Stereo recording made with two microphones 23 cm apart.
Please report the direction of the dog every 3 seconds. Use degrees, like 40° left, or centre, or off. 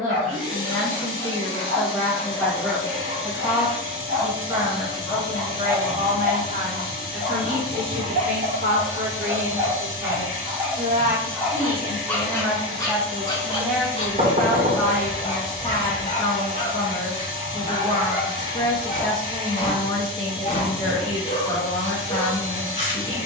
50° right, 50° right, 40° right, 10° right, 20° left, 30° left, 30° left, 30° left.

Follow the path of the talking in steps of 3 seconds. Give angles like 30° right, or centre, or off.
10° left, 20° right, 50° right, 40° right, centre, 20° left, 20° left, 20° left.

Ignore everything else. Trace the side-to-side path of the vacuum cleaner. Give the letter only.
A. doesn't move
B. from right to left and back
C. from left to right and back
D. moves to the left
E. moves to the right
A.